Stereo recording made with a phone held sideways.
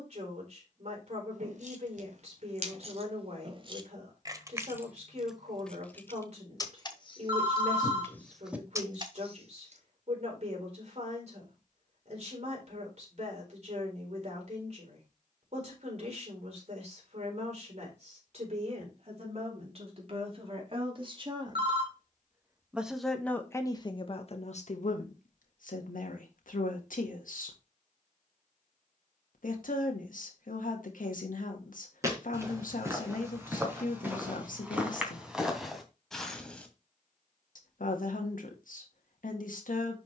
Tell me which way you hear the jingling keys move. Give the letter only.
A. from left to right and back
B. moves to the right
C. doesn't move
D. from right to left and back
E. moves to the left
D.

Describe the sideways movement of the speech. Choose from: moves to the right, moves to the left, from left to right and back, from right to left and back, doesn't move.
moves to the left.